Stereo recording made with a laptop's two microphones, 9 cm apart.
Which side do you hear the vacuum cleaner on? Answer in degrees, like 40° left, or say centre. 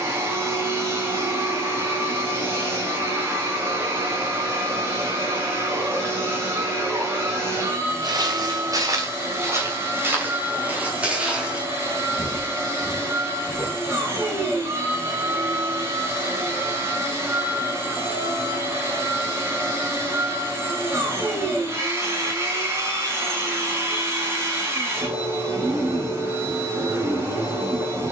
30° right.